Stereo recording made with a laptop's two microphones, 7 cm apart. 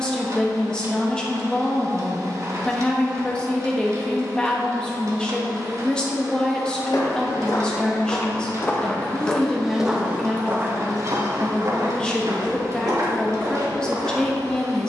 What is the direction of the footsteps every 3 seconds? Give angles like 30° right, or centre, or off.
off, off, 40° left, 20° right, 60° right.